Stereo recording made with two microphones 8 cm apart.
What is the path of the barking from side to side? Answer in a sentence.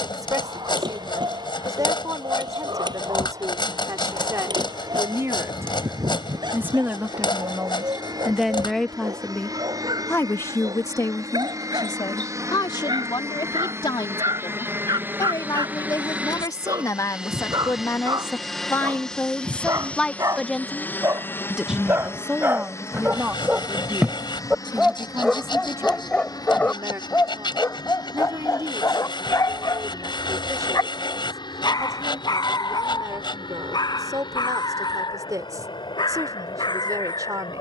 In this clip you hear the barking travel towards the left.